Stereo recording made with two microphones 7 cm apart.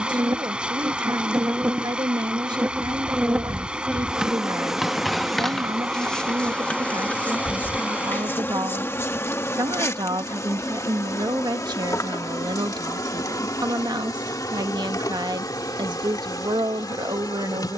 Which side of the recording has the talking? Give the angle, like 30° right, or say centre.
80° right.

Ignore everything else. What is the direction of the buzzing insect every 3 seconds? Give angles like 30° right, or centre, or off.
30° right, 10° right, 20° left, 40° left, 50° left, 60° left.